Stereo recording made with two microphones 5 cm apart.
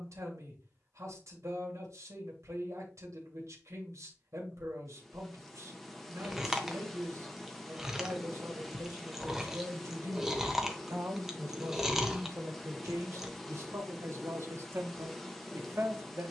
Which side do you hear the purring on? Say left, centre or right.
centre.